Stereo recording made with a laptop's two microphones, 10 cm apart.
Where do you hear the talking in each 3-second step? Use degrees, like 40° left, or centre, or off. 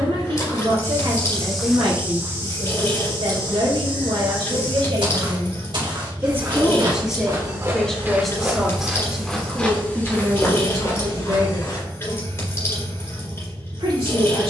70° right, 70° right, centre, 30° right, 70° right.